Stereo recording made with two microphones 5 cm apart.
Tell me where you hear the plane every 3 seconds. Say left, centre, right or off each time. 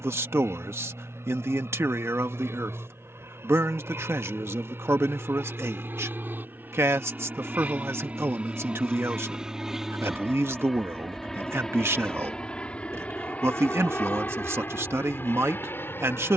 right, right, right, centre, left, left.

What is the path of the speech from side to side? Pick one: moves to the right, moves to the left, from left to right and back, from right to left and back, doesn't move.
doesn't move.